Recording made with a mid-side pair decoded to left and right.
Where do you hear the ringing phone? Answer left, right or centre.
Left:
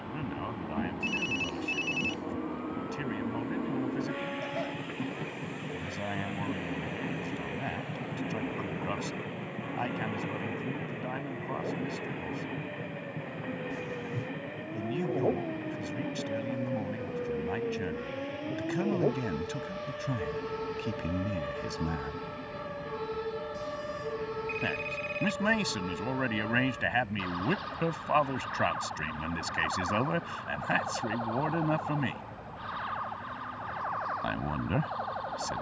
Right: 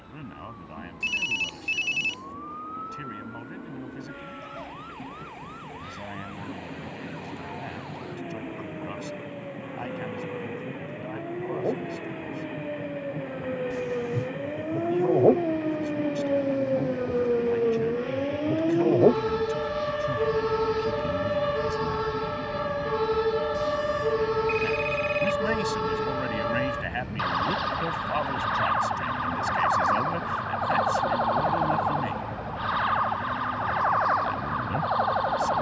right.